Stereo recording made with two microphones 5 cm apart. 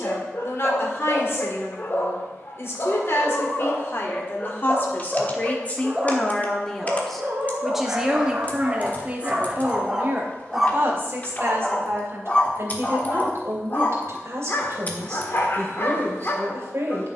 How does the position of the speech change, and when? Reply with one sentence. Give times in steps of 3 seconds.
In this clip you hear the speech on the left from 0 s, in the centre from 6 s and on the right from 9 s.